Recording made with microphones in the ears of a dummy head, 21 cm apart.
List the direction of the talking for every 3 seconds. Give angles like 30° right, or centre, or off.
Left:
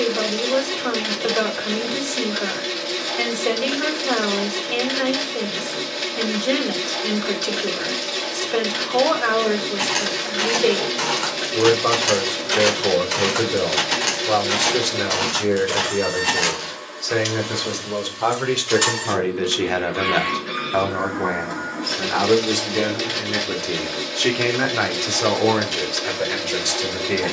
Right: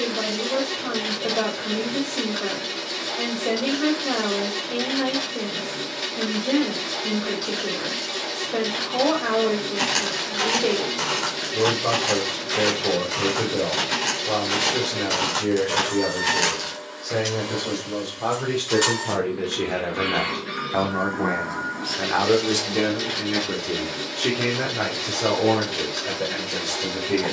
80° left, 80° left, 80° left, 80° left, 80° left, 70° left, 50° left, 10° left, 50° left.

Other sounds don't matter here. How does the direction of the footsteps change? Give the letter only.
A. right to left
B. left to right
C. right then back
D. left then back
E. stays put
D.